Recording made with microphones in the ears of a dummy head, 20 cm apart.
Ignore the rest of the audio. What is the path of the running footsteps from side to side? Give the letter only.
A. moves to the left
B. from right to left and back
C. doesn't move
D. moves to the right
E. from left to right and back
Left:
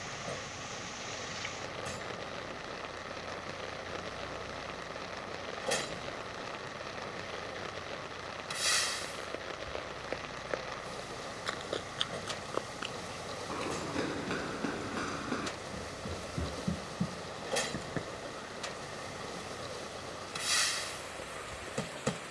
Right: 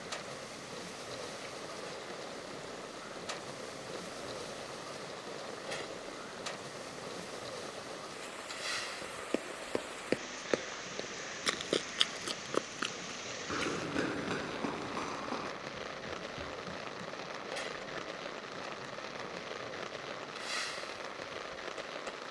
A.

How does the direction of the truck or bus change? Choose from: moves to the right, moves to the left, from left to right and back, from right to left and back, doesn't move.
doesn't move.